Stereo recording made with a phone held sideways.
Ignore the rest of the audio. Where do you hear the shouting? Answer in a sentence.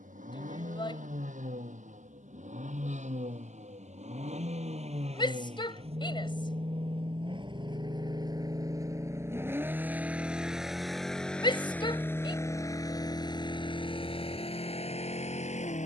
In this clip you hear the shouting on the left.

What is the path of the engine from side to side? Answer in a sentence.
You can hear the engine move from right to left.